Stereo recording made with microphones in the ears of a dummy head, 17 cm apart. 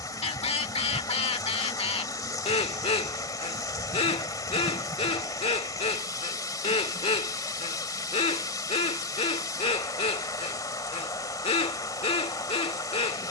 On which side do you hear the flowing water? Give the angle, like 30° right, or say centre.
20° left.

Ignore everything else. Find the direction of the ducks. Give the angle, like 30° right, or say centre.
30° left.